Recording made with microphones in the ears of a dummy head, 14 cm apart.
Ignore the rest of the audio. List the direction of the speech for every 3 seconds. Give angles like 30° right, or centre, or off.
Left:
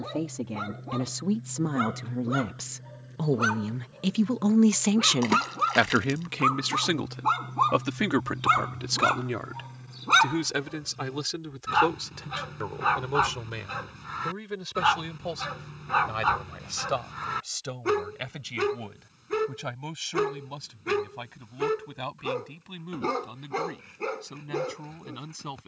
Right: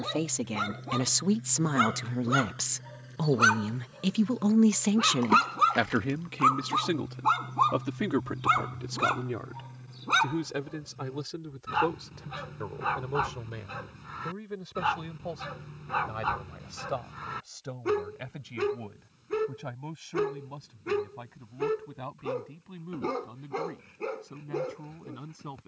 50° right, centre, 50° left, 60° left, 70° left, 70° left, 70° left, 70° left, 70° left.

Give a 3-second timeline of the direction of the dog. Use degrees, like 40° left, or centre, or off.
50° right, 30° right, centre, 20° left, 30° left, 30° left, 30° left, 30° left, 30° left.